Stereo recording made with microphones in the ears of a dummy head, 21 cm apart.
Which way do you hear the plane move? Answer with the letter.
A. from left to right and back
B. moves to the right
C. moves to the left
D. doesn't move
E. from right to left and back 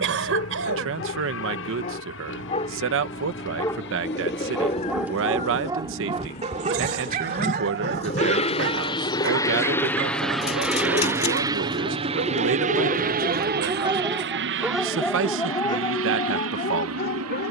B.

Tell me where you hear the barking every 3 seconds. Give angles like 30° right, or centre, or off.
40° left, centre, 40° right, 60° right, 30° right, 30° left.